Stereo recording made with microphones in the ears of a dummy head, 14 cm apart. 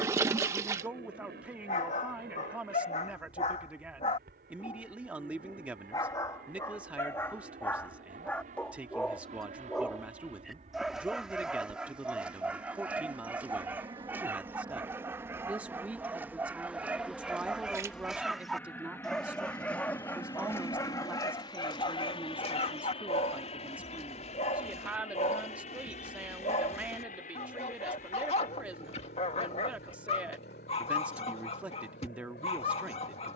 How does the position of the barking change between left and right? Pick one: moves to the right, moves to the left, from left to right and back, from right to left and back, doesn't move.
from left to right and back.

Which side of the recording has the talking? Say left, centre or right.
centre.